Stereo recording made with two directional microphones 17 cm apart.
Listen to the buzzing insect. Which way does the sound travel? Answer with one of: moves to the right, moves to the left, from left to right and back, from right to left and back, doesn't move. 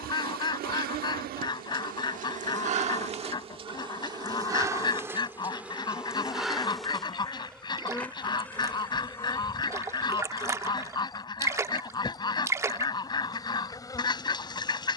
moves to the left.